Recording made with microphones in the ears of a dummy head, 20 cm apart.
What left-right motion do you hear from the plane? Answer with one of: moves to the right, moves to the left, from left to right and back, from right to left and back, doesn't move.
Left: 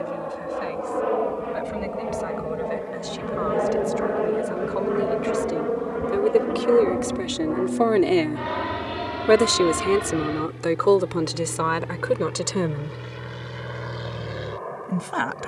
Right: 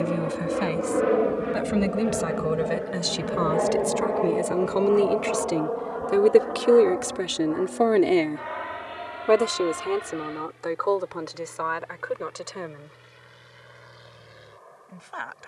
moves to the left.